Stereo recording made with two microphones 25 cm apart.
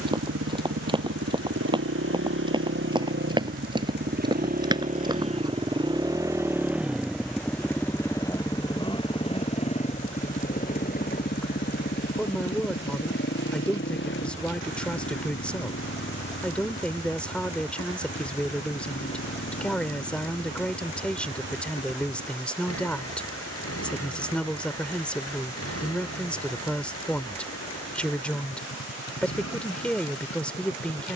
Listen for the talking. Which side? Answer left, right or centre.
centre.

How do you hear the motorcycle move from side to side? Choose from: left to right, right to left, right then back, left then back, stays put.
right to left.